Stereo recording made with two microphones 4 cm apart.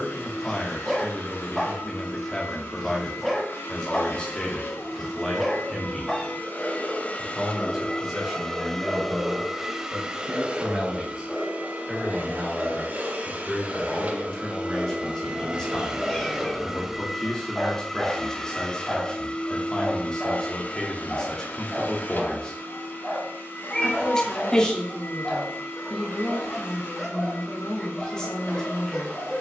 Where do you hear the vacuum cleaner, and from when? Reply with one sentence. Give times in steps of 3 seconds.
In this clip you hear the vacuum cleaner on the left from 0 s, on the right from 9 s, in the centre from 15 s and on the left from 18 s.